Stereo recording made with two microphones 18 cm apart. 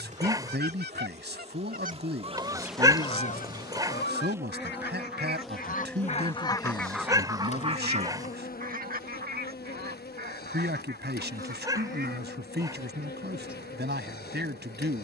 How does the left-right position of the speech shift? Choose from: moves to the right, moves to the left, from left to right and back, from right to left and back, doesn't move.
doesn't move.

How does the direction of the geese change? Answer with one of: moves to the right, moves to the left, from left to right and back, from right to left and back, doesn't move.
from right to left and back.